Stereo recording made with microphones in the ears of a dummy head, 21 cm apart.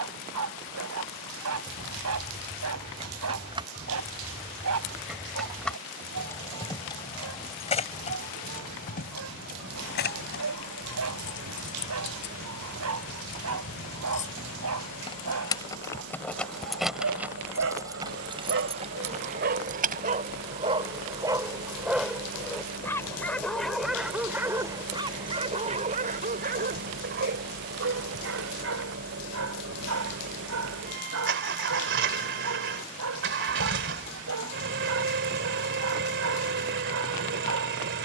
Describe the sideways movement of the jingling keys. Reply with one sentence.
You can hear the jingling keys move from right to left and back again.